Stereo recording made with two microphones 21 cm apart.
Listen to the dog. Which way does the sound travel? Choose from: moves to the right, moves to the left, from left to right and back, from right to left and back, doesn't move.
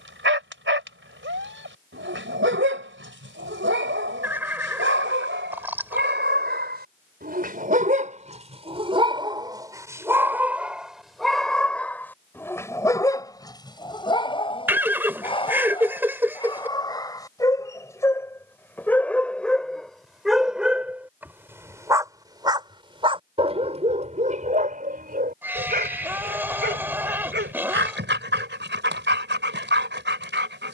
from right to left and back.